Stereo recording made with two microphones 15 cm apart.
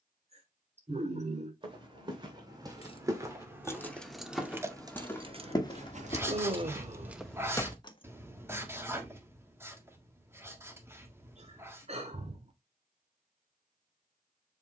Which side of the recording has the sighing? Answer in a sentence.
You can hear the sighing on the right.